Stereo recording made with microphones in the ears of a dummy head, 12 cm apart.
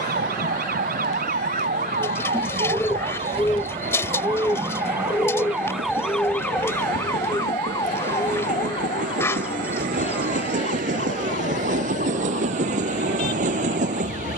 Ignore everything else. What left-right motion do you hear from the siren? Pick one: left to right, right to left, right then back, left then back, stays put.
right to left.